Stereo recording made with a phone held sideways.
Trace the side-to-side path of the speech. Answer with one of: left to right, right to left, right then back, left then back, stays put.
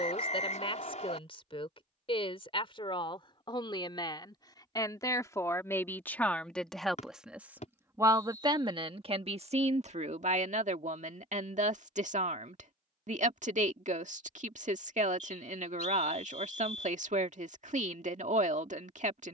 left to right.